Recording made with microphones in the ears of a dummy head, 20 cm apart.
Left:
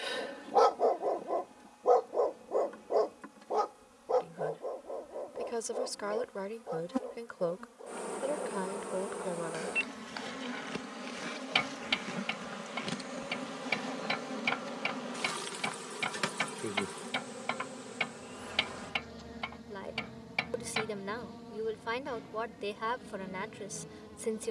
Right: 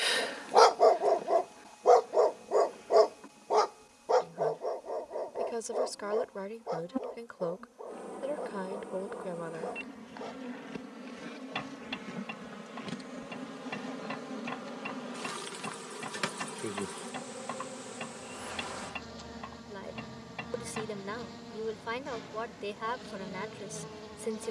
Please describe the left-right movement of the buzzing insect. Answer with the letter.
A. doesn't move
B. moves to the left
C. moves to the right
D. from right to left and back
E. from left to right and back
C.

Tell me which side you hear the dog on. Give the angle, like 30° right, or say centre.
50° right.